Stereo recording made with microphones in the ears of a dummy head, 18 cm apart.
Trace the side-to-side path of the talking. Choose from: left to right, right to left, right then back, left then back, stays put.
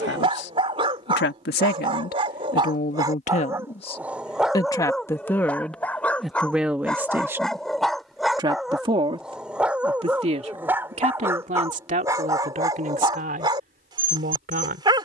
left to right.